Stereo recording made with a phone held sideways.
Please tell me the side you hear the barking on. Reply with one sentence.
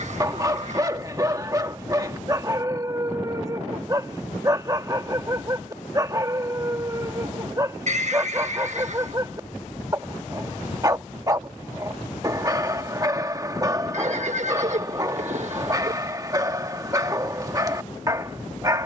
In this clip you hear the barking on the right.